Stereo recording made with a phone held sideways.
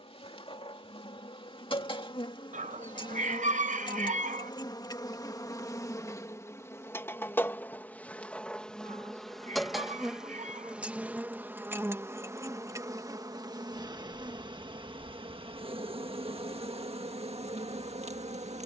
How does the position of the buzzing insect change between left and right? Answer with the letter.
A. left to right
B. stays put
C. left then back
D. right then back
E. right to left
A.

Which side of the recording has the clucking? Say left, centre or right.
right.